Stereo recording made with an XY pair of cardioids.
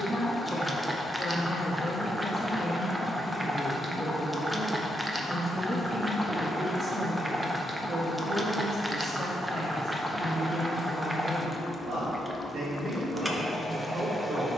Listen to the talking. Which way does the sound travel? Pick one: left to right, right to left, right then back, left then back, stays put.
left to right.